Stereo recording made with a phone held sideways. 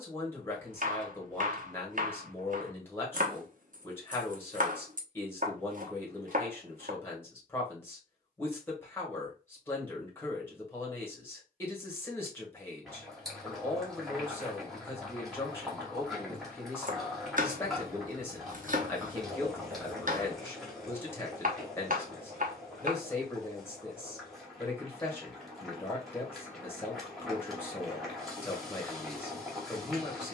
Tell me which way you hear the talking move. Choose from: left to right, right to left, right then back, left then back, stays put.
stays put.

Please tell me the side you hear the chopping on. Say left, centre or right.
right.